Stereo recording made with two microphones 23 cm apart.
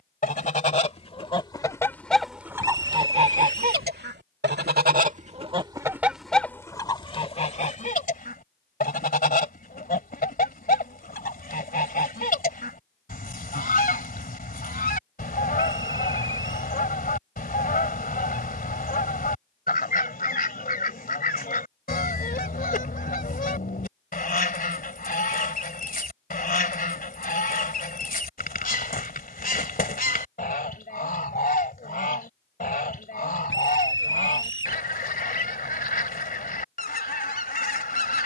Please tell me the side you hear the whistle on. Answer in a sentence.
In this clip you hear the whistle on the left.